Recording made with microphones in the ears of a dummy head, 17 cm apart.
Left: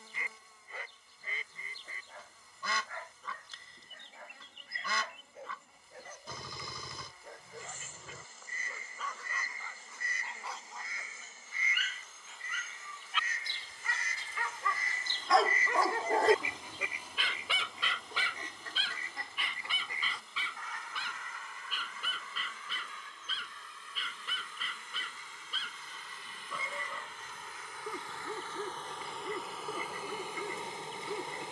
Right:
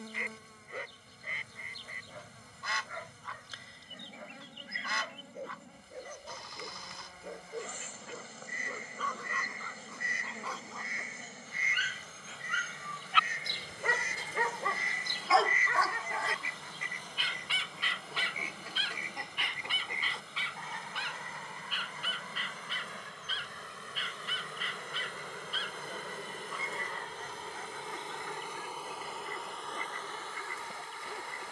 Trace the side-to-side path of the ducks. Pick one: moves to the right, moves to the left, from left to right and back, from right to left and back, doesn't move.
moves to the right.